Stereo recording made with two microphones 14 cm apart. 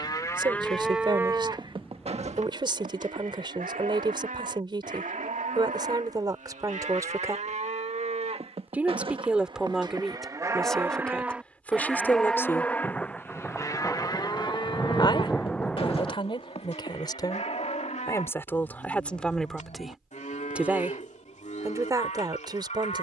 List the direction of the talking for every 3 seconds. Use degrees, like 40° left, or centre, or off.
30° right, 30° right, 20° right, centre, 20° left, 30° left, centre, 30° right.